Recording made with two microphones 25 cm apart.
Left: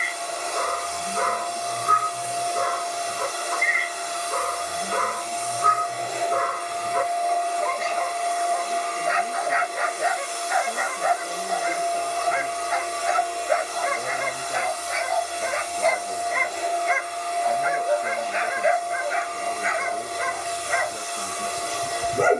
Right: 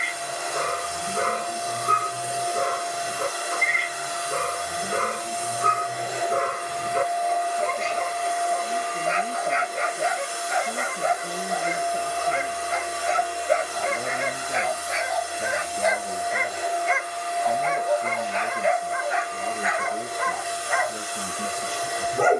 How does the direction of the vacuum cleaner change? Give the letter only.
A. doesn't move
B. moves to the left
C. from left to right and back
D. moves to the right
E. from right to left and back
A.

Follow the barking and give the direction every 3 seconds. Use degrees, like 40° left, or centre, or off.
30° right, 30° right, 30° right, 30° right, 30° right, 10° right, 30° left, 30° left.